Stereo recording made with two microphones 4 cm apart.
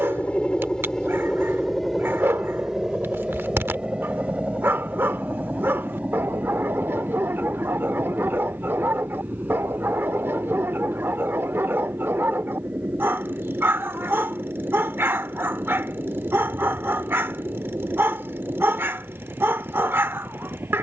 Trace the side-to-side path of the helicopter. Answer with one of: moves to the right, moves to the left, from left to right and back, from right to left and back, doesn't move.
moves to the right.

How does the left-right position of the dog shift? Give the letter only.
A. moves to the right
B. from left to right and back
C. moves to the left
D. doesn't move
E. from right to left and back
D.